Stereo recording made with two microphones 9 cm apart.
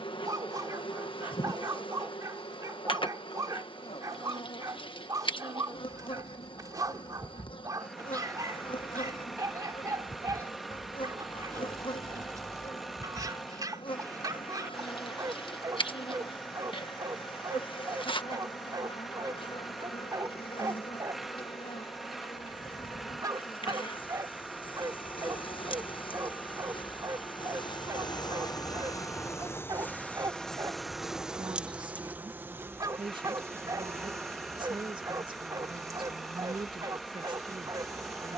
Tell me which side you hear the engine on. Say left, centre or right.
centre.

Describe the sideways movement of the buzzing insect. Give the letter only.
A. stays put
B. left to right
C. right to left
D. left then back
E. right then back
B.